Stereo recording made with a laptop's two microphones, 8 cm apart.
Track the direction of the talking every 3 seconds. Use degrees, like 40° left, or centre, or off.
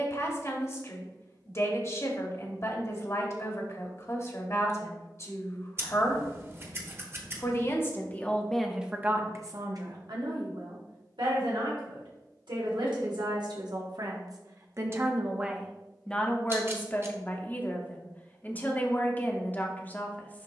40° left, 40° left, 20° left, 60° right, 60° right, 10° left, 20° left.